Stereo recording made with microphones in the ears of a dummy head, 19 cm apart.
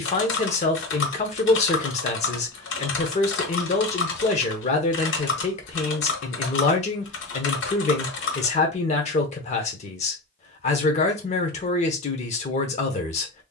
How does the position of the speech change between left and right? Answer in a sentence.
In this clip you hear the speech stay put.